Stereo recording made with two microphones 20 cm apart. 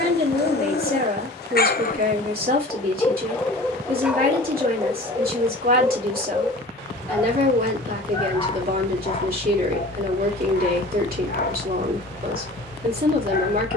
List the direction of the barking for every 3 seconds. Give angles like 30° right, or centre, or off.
50° left, 10° right, 10° left, 50° left, 50° left.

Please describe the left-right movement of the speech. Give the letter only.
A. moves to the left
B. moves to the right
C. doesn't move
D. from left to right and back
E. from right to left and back
C.